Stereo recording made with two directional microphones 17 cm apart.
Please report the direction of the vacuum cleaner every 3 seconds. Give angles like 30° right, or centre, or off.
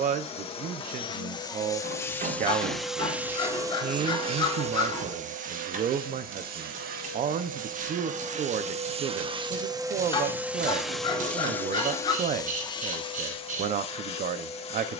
20° left, 40° right, 60° right, 10° right, 30° left.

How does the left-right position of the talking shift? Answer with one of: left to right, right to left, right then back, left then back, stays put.
stays put.